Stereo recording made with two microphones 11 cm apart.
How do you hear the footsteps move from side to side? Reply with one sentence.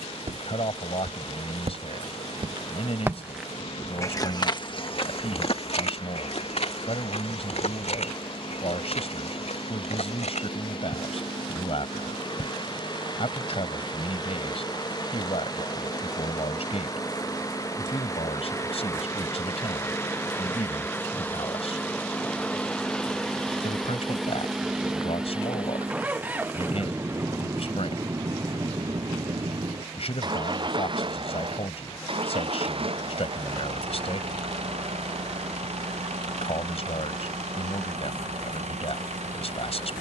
You can hear the footsteps move from right to left.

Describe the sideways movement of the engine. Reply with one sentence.
You can hear the engine go from the left side to the right.